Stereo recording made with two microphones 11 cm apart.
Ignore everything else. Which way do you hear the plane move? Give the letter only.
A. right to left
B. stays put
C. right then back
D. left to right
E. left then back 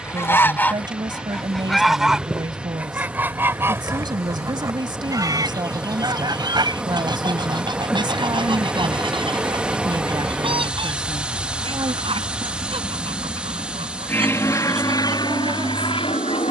A.